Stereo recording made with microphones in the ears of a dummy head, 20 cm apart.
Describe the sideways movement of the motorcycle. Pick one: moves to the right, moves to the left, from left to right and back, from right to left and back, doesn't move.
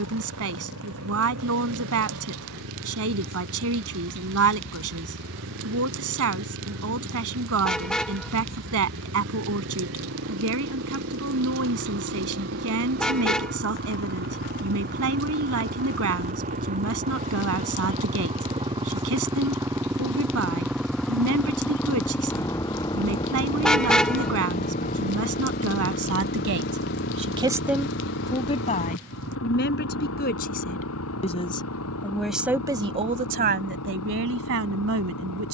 moves to the left.